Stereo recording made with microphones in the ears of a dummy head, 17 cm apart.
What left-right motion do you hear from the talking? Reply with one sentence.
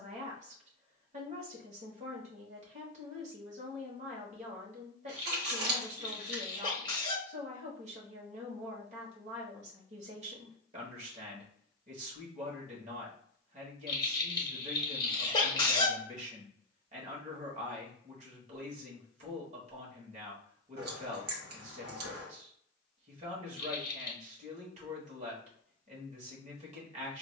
In this clip you hear the talking stay in one place.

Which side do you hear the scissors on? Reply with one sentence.
You can hear the scissors on the right.